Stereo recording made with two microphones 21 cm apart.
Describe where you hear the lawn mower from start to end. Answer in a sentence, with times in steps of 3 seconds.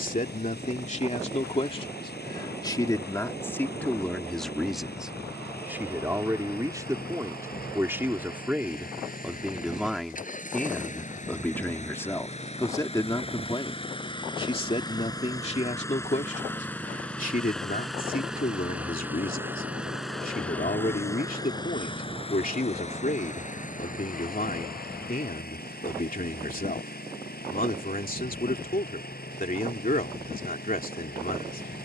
You can hear the lawn mower on the left from 0 s, in the centre from 15 s and on the left from 21 s.